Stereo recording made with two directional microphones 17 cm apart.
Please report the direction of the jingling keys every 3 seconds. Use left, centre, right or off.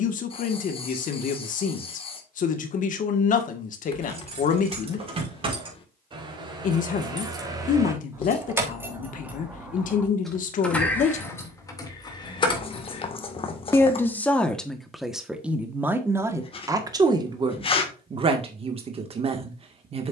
off, right, right, centre, left, off, off.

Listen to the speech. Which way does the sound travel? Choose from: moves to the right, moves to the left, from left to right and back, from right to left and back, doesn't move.
moves to the right.